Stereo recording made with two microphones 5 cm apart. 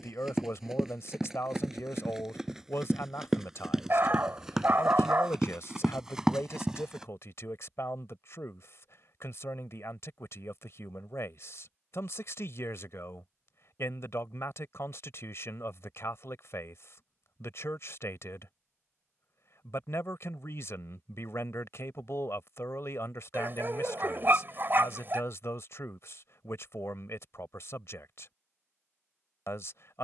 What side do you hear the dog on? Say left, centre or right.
right.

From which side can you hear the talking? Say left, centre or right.
left.